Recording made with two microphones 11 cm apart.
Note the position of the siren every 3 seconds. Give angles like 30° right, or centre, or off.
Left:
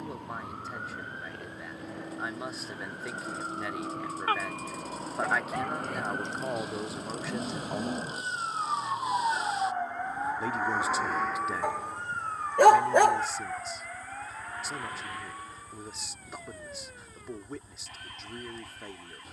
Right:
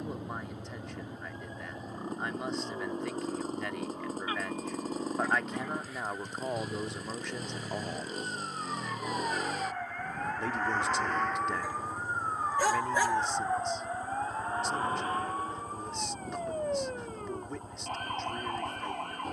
80° left, 70° left, 50° left, 10° left, 20° right, 40° right, 50° right.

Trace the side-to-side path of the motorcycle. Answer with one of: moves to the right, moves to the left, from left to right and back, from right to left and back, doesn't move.
doesn't move.